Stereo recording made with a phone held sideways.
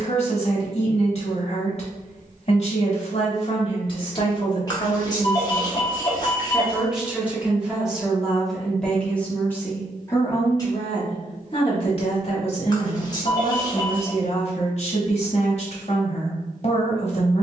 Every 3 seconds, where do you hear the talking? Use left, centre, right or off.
left, left, centre, left, left, left.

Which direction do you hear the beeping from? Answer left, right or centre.
left.